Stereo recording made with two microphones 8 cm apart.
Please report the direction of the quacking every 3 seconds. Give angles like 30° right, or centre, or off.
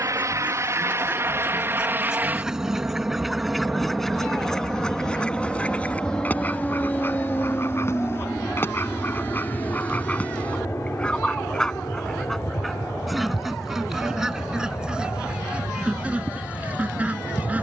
10° right, 10° left, 30° left, 20° left, centre, 20° right.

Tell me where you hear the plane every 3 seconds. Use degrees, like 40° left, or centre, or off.
30° right, centre, 20° left, 30° left, 40° left, 50° left.